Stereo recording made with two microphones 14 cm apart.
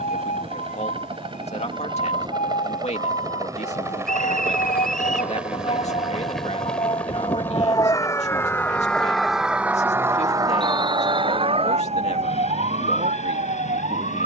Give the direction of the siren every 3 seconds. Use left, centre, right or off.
left, left, left, right, right.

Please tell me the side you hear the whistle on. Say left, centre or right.
centre.